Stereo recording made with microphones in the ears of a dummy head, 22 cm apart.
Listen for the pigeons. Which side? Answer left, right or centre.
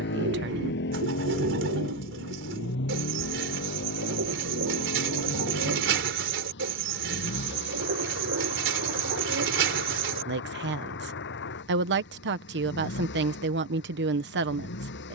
right.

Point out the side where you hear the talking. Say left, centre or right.
right.